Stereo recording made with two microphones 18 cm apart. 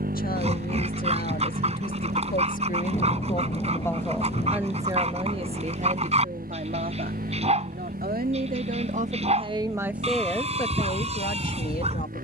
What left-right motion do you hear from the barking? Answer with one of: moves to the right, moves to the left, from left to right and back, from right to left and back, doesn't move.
doesn't move.